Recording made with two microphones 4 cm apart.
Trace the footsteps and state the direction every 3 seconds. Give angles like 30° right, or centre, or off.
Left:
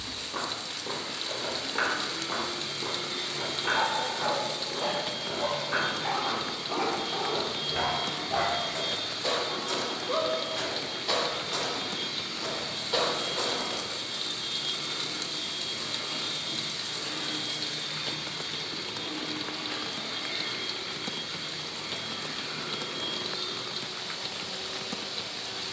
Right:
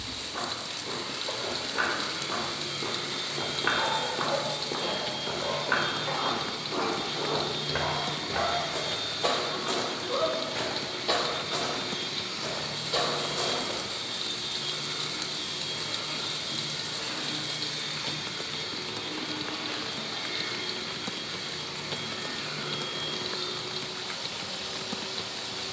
10° left, 50° right, 70° right, 30° right, 20° left, off, off, off, off.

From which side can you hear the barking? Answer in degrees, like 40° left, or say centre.
50° left.